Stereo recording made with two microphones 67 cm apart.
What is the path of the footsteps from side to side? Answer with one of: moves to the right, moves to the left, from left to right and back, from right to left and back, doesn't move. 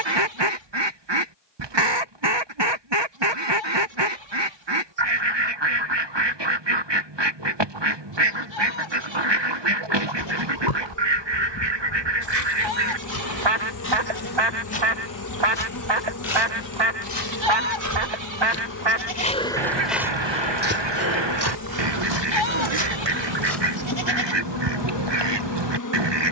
moves to the right.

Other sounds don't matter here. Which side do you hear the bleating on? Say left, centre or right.
right.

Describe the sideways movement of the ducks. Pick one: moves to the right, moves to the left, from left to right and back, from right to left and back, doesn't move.
doesn't move.